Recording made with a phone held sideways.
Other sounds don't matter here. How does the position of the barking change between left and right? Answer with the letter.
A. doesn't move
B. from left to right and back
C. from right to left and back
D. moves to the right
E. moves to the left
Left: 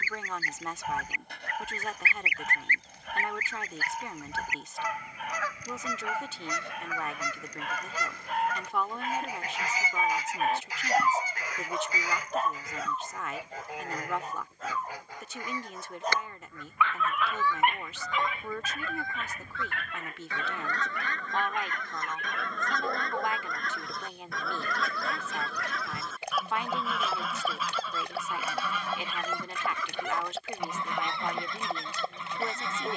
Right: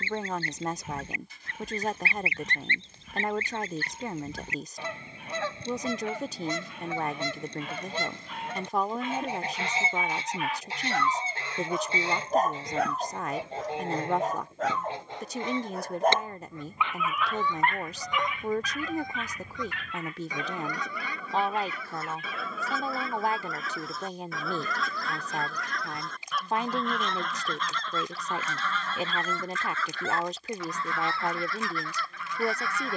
B.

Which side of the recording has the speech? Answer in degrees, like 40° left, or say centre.
30° right.